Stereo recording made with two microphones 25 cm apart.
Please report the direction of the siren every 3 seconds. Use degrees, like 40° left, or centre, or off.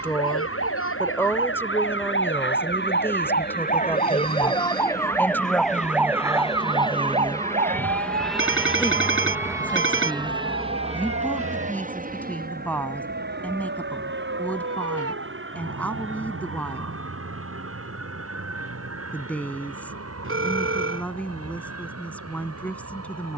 50° left, 20° left, 30° right, 50° right, 60° right, 70° right, 70° right, 70° right.